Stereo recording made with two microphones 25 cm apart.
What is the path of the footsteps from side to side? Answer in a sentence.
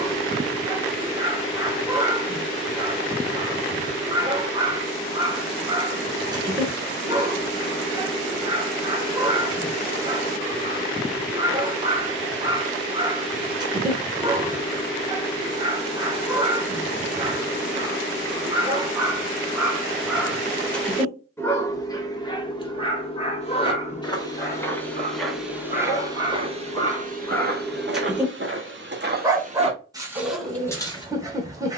You can hear the footsteps move from left to right and back again.